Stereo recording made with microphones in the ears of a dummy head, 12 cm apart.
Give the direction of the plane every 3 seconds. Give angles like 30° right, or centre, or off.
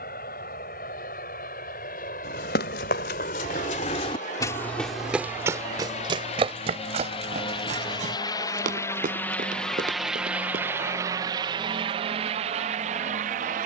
60° left, 50° left, 40° left, 10° right, 50° right.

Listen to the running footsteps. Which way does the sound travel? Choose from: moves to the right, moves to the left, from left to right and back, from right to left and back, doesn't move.
moves to the right.